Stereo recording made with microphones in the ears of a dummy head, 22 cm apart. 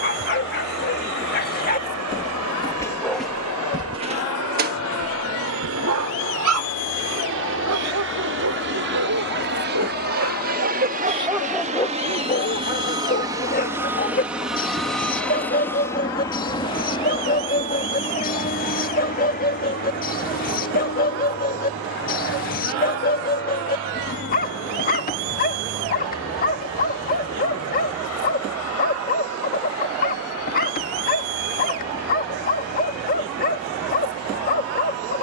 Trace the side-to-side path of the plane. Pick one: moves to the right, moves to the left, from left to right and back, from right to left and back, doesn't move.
moves to the left.